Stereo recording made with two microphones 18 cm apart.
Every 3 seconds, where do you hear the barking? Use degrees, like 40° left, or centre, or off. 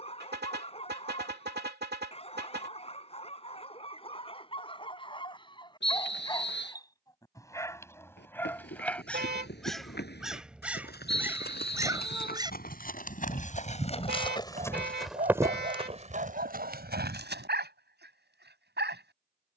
30° left, 30° left, 20° left, 10° right, 30° right, 50° right, 70° right.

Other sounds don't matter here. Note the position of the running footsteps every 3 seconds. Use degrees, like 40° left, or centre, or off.
off, off, 70° left, 60° left, 40° left, 40° right, off.